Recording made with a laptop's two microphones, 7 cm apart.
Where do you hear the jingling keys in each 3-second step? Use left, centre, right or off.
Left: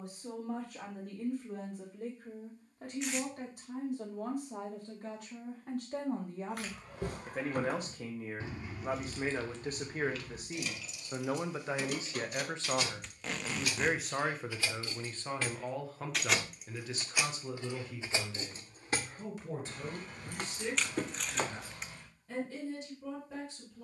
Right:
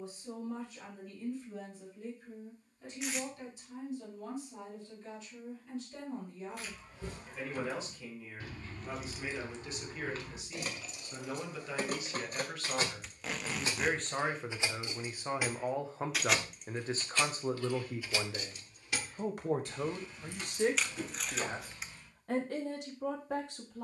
off, off, left, right, right, centre, left, left.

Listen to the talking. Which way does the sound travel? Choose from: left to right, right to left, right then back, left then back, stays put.
left to right.